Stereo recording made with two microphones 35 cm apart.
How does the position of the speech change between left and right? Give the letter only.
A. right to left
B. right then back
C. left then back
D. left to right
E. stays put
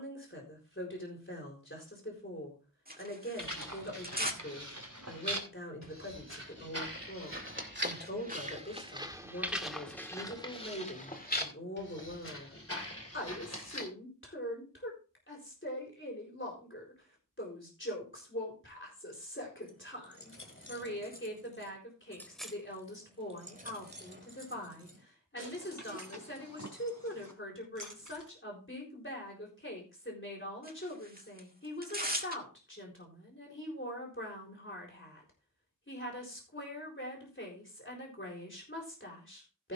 E.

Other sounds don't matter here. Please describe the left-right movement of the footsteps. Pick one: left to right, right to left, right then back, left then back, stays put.
right to left.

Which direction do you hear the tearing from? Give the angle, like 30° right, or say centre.
30° right.